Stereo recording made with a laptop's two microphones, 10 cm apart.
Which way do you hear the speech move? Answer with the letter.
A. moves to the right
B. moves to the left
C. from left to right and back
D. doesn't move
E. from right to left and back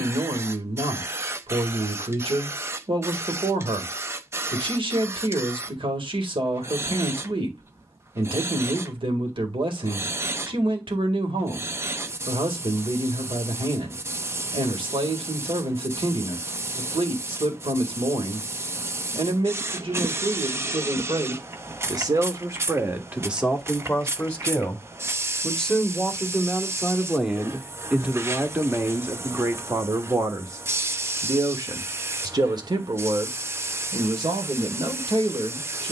E.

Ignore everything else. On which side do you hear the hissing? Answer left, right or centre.
right.